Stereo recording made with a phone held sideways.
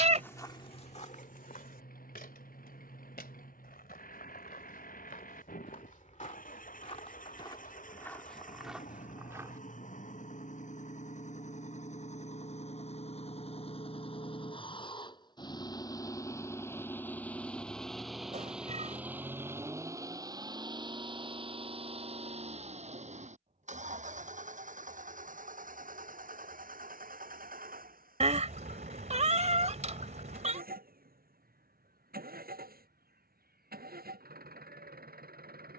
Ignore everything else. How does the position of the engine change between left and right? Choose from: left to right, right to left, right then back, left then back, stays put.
left to right.